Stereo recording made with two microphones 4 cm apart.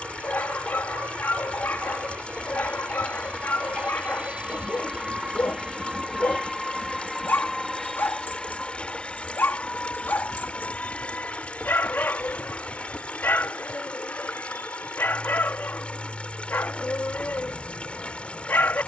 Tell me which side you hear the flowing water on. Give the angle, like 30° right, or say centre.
30° left.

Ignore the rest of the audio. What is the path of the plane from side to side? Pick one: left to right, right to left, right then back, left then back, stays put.
right to left.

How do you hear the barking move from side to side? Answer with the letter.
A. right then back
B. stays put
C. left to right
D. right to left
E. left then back
B.